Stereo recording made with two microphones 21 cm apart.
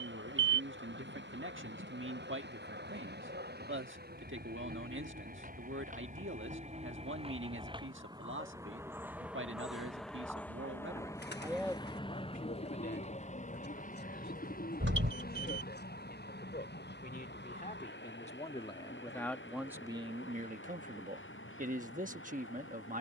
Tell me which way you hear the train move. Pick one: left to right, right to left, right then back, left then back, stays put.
right to left.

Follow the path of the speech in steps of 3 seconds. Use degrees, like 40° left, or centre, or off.
70° right, 70° right, 70° right, 50° right, 50° left, 50° left, centre, 40° right.